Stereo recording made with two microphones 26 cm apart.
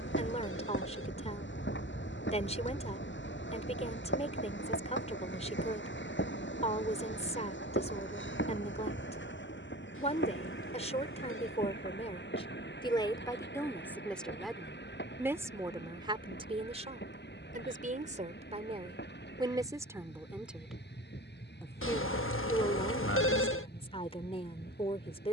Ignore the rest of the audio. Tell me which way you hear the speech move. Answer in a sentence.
In this clip you hear the speech go right and come back.